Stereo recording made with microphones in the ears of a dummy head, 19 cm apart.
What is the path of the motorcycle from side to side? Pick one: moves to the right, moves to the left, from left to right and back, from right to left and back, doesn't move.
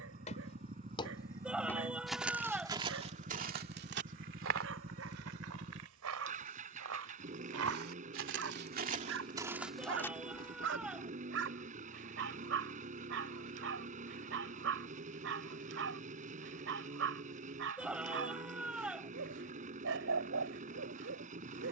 doesn't move.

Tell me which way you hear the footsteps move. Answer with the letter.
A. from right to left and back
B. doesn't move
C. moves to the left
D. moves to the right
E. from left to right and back
E.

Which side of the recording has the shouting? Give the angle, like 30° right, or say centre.
10° right.